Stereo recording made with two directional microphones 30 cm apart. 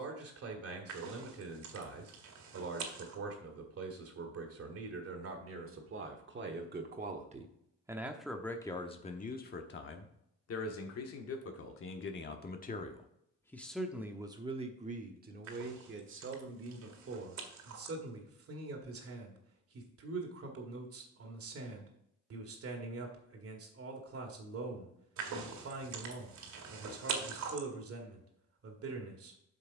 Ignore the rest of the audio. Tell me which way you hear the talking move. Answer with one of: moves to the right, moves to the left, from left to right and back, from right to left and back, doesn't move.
from right to left and back.